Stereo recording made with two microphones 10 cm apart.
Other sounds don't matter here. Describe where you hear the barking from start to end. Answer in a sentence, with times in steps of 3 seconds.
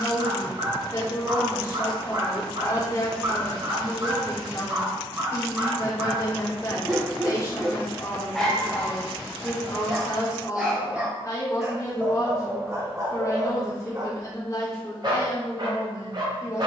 You can hear the barking on the right from 0 s, in the centre from 6 s and on the right from 12 s.